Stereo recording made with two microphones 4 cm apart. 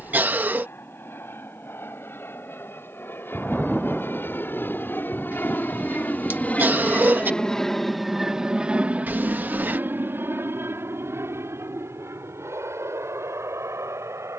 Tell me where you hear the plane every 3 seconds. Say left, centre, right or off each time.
left, left, centre, right, right.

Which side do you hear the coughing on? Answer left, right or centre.
right.